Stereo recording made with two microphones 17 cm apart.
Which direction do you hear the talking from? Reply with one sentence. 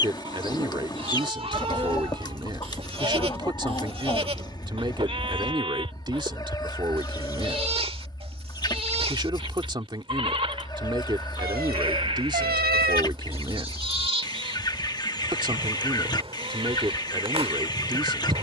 In this clip you hear the talking on the right.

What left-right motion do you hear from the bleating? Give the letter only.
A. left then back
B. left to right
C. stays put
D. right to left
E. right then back
C.